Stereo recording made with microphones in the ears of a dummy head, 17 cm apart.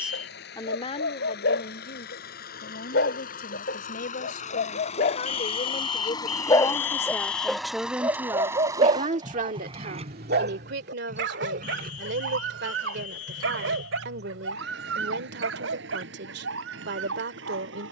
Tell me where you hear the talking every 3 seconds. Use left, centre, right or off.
left, left, centre, right, right, right.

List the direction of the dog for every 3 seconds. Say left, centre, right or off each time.
left, left, centre, right, right, right.